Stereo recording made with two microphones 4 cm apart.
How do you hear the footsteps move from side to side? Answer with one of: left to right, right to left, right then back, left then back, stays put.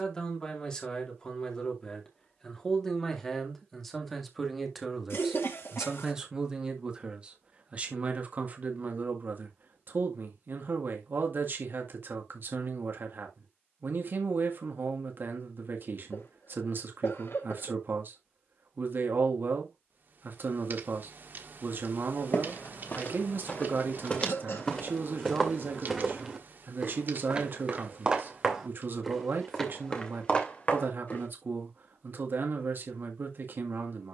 right then back.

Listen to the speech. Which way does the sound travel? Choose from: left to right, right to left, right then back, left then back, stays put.
left to right.